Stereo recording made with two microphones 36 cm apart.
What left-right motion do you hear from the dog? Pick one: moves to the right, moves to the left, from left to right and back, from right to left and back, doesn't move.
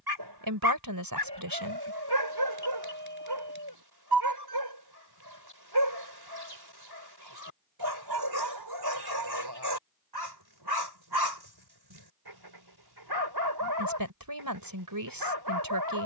doesn't move.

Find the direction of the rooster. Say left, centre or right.
right.